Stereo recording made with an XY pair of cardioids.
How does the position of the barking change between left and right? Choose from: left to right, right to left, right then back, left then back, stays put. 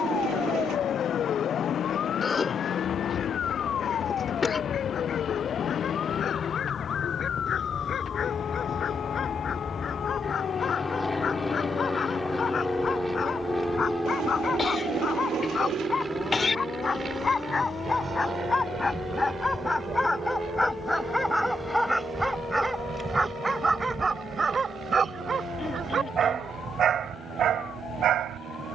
left to right.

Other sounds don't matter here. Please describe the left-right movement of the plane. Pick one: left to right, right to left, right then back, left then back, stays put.
left to right.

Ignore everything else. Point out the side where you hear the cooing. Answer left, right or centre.
right.